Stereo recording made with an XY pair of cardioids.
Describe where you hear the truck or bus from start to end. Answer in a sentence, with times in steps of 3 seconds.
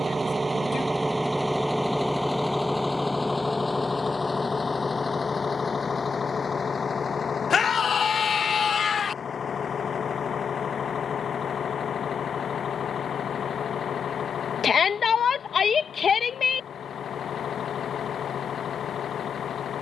You can hear the truck or bus in the centre from 0 s and on the left from 3 s.